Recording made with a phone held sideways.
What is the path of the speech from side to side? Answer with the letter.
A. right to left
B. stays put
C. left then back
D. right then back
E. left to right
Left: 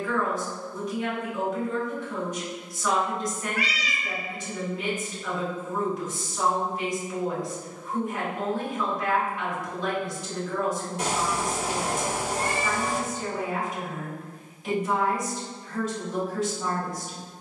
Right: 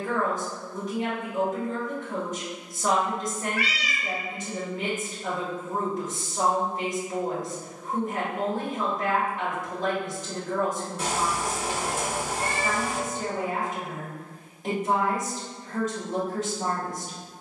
B.